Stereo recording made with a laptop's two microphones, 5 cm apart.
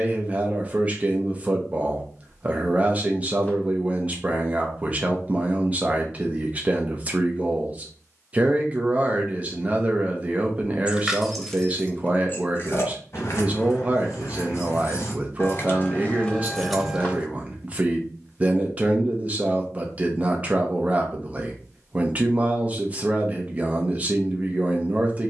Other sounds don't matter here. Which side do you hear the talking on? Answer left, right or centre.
right.